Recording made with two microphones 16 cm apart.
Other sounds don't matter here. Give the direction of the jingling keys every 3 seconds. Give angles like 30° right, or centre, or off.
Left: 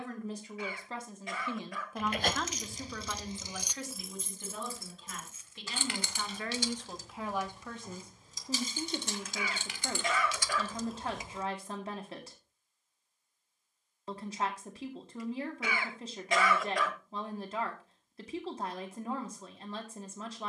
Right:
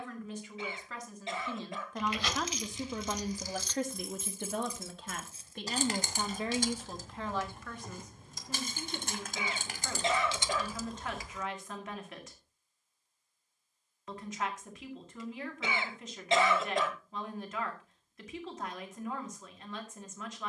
50° left, 10° right, 50° right, 20° right, off, off, off.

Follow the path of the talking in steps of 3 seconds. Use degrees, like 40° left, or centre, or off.
10° left, 60° right, 10° left, 30° left, 30° left, 30° left, 30° left.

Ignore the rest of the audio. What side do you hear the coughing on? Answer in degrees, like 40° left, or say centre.
20° right.